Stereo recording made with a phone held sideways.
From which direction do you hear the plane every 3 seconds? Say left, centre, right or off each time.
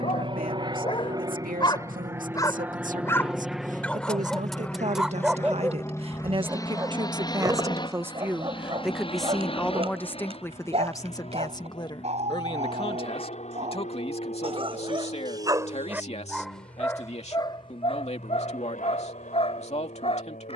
right, centre, left, left, left, left, left.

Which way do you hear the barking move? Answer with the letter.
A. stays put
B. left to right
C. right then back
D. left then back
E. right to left
C.